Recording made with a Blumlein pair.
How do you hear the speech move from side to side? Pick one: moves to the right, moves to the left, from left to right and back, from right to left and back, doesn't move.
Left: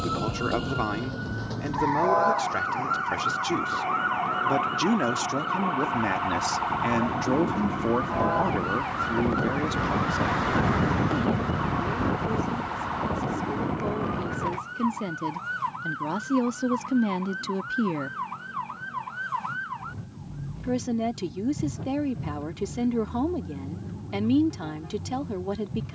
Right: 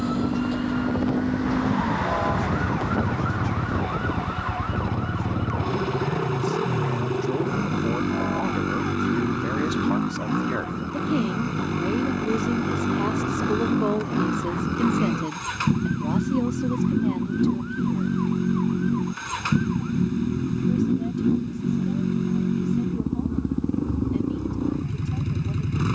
from left to right and back.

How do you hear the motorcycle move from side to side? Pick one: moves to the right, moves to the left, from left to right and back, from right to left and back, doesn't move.
doesn't move.